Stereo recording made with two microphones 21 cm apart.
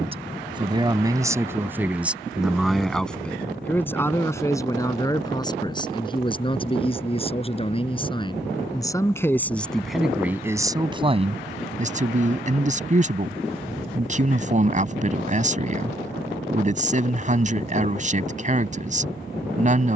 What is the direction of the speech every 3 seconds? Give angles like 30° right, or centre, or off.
10° right, 10° left, 20° left, 10° right, 40° right, 40° right, 40° right.